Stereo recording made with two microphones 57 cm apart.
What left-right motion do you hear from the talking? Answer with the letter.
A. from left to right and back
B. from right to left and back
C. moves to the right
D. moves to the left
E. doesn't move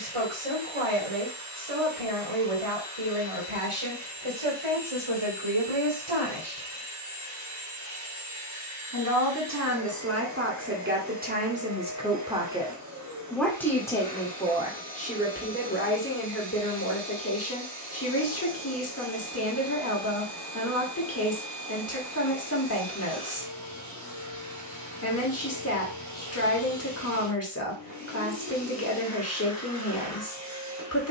D.